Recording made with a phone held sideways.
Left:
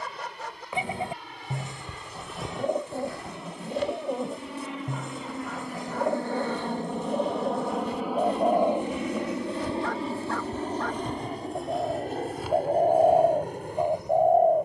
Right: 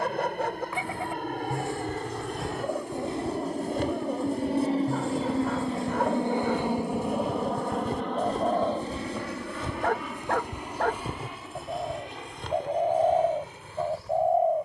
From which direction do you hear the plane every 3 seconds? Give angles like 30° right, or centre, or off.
70° right, 40° right, centre, 30° left, 50° left.